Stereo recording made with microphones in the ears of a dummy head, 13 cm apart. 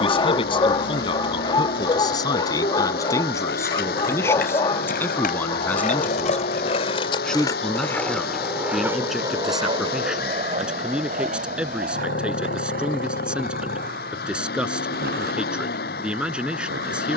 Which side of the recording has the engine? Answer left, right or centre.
left.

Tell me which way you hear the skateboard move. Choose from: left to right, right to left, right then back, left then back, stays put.
left to right.